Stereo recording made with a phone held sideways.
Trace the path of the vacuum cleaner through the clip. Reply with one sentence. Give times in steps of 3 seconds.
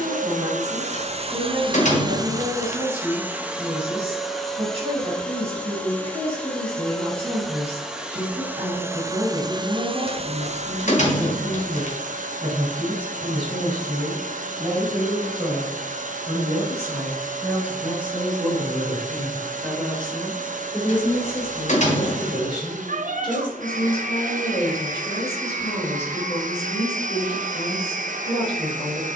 You can hear the vacuum cleaner on the right from 0 s, in the centre from 3 s and on the right from 9 s.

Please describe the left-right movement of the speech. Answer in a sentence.
In this clip you hear the speech move to the left.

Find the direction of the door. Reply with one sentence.
In this clip you hear the door on the left.